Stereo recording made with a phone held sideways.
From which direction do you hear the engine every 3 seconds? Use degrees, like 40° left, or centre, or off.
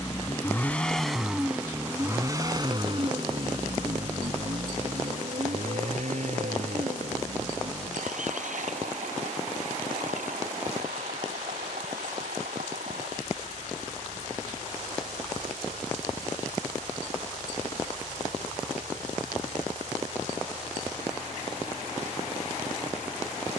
10° right, 50° right, 70° right, 80° right, 80° right, 80° right, 80° right, 80° right.